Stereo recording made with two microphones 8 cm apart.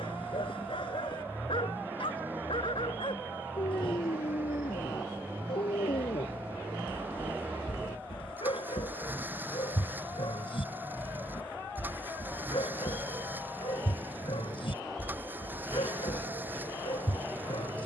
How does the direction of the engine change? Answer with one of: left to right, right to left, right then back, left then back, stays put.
stays put.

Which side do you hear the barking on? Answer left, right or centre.
left.